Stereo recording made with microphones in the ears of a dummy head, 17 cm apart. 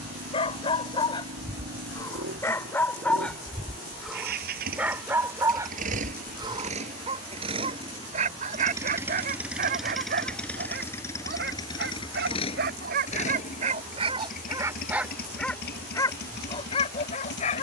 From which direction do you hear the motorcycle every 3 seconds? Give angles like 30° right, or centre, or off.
60° right, 50° right, 30° right, 10° left, 40° left, 60° left.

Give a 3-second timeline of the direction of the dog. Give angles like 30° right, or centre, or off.
20° left, centre, 30° right, 50° right, 40° right, 30° left.